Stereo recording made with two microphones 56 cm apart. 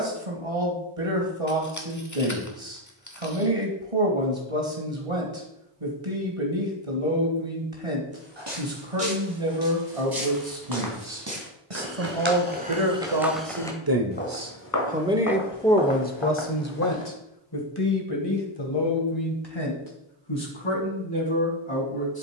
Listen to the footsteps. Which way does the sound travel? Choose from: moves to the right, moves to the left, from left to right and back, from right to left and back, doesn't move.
moves to the left.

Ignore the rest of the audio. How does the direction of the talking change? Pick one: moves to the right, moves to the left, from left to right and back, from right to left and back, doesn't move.
moves to the left.